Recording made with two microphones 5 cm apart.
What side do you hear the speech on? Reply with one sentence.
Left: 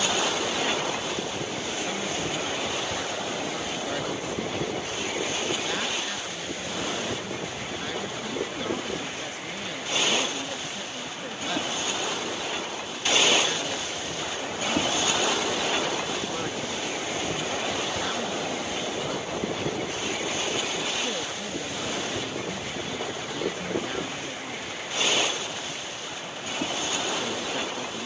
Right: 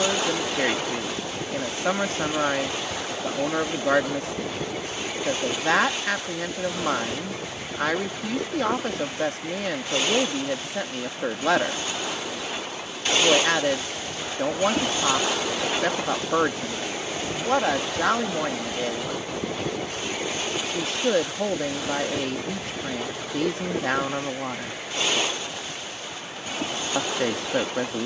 In this clip you hear the speech on the right.